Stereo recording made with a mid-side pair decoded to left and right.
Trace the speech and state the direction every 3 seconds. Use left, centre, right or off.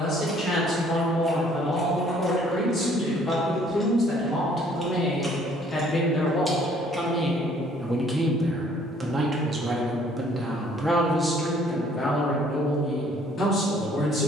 left, left, centre, centre, left.